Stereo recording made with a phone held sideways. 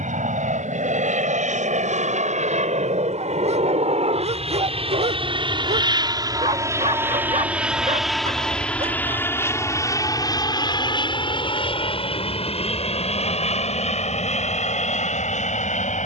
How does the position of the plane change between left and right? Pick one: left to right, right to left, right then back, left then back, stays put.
right to left.